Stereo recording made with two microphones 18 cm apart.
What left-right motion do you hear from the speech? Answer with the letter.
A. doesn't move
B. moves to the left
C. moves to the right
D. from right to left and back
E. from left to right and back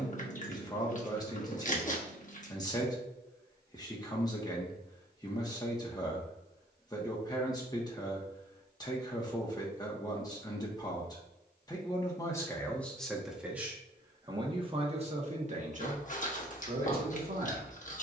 C.